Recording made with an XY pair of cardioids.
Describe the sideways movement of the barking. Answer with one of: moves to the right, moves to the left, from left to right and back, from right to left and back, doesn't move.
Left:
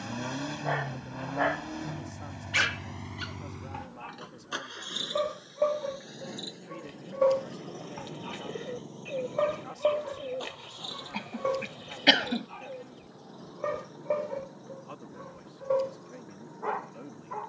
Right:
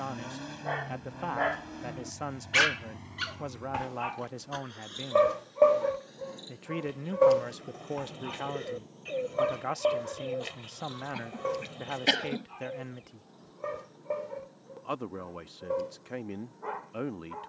from left to right and back.